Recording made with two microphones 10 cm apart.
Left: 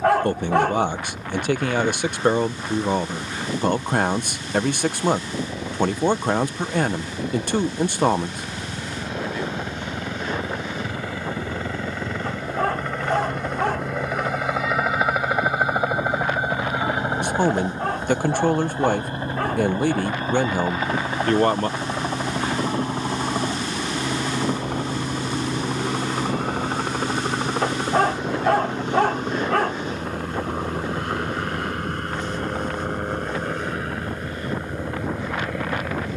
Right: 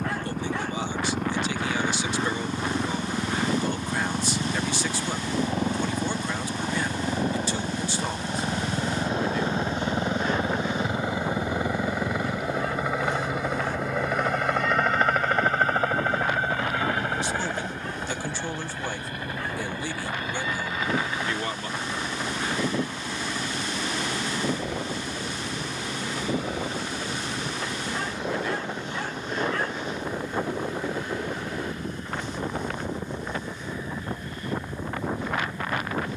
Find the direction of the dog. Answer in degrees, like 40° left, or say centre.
70° left.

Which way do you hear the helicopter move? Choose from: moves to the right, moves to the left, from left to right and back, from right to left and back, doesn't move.
moves to the left.